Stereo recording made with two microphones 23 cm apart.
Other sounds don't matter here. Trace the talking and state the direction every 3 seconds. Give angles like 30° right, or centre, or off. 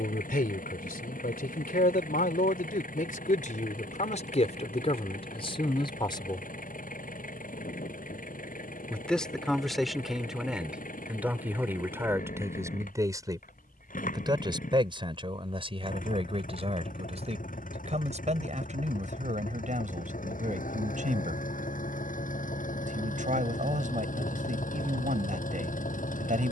40° left, 30° left, 20° left, centre, 20° right, 30° right, 30° right, 40° right, 40° right.